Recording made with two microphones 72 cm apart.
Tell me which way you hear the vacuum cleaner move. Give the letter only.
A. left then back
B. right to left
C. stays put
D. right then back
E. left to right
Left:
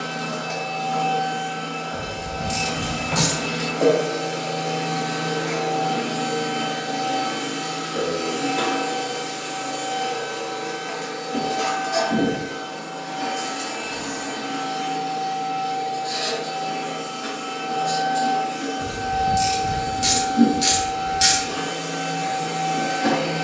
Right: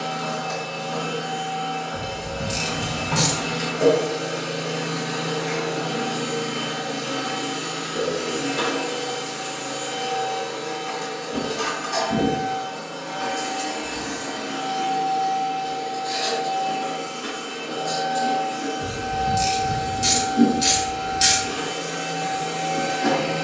B.